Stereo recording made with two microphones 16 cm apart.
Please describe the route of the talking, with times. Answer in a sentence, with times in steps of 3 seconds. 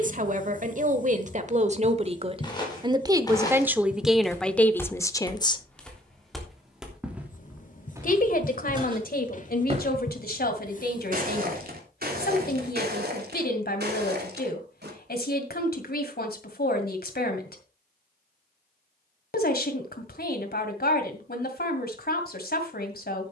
In this clip you hear the talking on the right from 0 s, in the centre from 3 s and on the left from 6 s.